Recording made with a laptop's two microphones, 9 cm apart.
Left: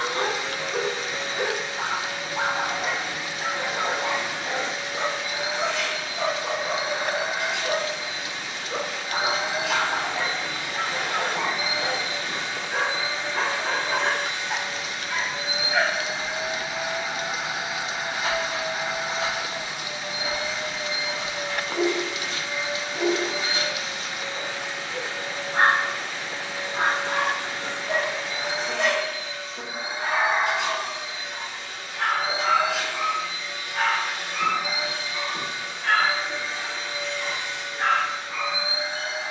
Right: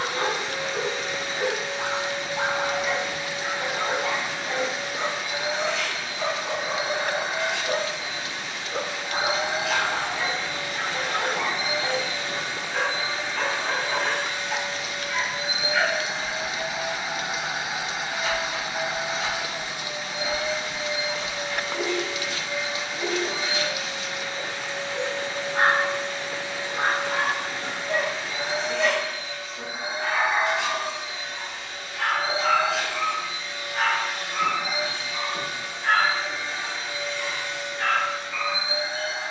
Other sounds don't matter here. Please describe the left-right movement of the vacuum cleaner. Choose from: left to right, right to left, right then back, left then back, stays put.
stays put.